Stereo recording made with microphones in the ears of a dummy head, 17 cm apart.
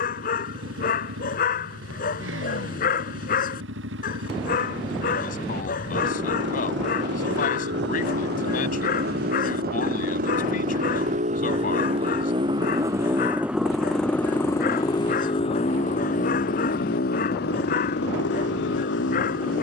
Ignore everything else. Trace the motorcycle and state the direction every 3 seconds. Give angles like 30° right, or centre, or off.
70° right, 70° right, 60° right, 40° right, centre, 40° left, 60° left.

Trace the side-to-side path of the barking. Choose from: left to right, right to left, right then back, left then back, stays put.
stays put.